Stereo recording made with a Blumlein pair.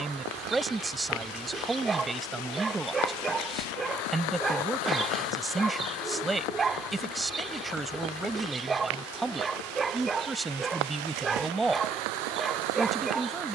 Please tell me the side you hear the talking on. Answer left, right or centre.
centre.